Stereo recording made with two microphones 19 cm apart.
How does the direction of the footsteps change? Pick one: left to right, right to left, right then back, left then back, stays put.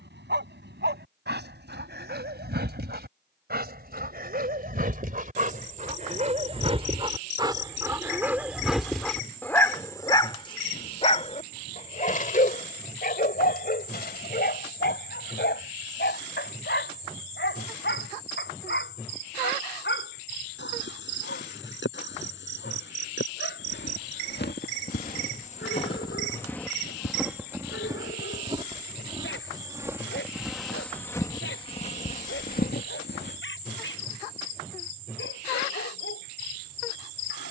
right then back.